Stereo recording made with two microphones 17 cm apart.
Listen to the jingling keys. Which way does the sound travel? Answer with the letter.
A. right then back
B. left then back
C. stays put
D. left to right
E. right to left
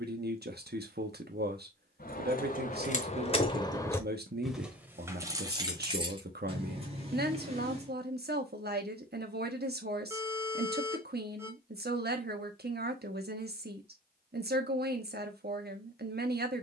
D.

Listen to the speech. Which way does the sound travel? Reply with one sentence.
You can hear the speech stay put.